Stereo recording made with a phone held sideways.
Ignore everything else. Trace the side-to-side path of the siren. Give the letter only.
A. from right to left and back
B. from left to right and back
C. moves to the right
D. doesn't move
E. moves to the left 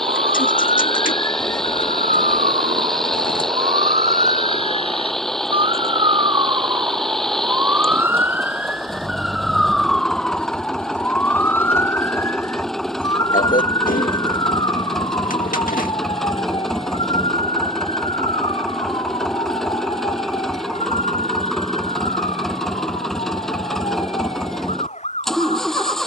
E.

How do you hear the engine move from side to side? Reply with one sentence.
You can hear the engine stay in one place.